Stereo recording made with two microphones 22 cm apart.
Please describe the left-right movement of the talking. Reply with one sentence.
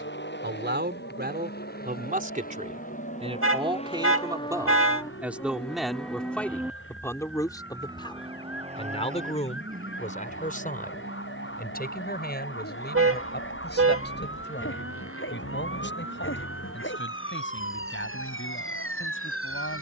In this clip you hear the talking move to the left.